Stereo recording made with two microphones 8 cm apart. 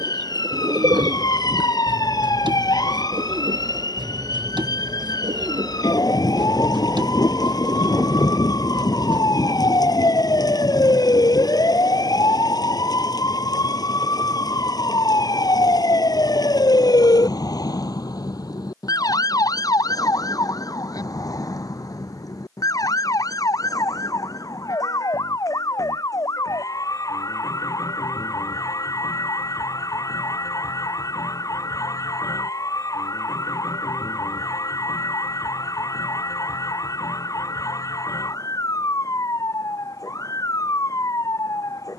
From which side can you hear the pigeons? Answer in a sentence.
You can hear the pigeons on the right.